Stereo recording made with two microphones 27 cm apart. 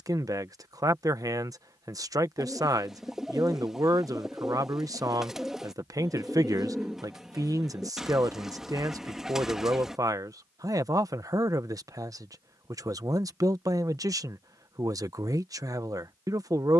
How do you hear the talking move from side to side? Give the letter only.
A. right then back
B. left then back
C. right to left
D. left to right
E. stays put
E.